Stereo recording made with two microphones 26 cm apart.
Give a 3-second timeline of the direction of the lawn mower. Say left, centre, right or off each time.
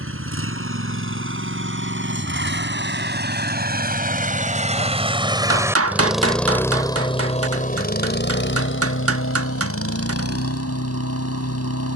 right, right, left, left.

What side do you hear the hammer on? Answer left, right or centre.
right.